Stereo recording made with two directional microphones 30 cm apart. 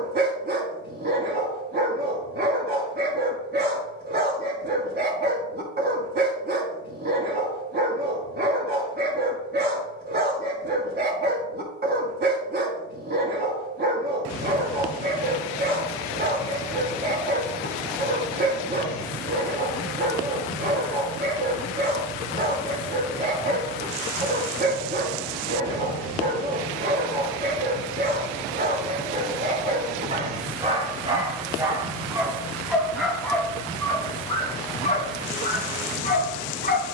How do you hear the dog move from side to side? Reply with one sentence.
You can hear the dog move from right to left.